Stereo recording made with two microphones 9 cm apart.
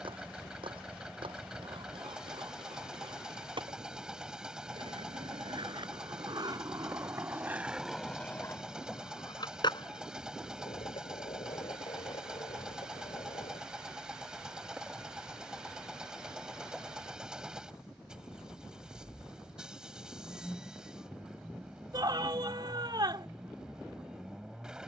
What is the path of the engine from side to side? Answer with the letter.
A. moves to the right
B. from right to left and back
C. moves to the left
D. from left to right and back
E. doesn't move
E.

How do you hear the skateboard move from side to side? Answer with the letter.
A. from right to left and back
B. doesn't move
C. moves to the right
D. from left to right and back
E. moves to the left
E.